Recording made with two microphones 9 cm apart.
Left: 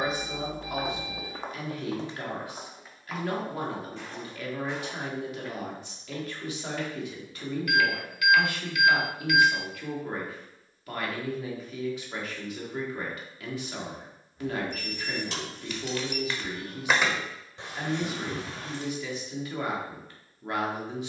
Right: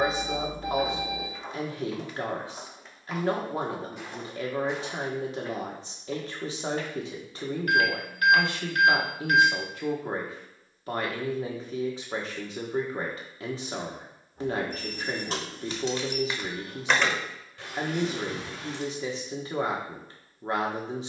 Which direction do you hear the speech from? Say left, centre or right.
right.